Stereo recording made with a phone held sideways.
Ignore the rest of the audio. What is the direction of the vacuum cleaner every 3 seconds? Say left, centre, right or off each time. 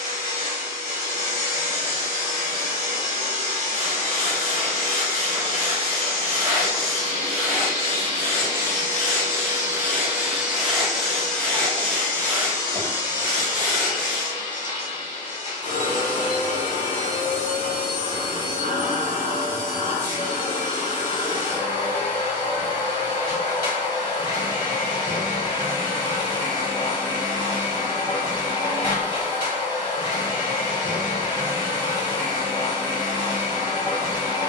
right, right, right, centre, left, left, left, left, left, left, left, left.